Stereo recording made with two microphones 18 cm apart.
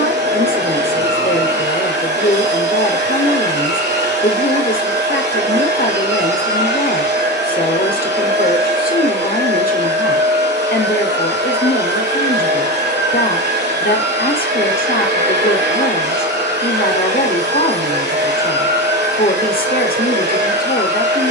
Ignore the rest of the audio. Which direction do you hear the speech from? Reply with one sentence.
In this clip you hear the speech on the left.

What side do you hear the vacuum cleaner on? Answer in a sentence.
You can hear the vacuum cleaner on the right.